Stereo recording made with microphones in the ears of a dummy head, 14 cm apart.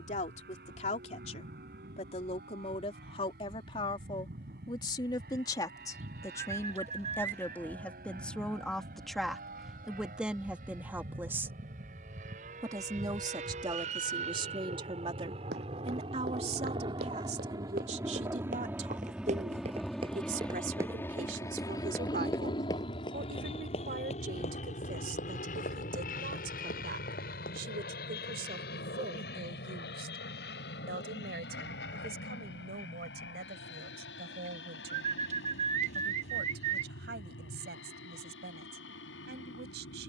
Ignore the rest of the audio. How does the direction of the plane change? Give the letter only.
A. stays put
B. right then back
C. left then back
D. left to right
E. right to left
E.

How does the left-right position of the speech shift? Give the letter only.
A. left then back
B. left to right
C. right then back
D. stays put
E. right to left
B.